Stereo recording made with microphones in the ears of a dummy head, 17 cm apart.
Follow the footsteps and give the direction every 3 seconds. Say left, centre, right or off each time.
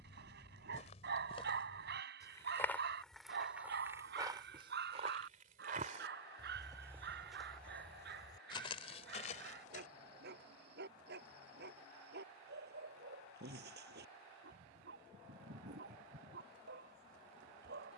left, right, centre, left, off, off.